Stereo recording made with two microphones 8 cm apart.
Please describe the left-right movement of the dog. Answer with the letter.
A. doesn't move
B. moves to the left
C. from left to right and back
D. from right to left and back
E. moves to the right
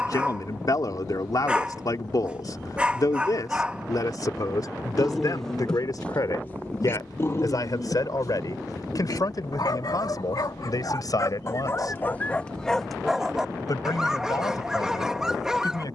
D.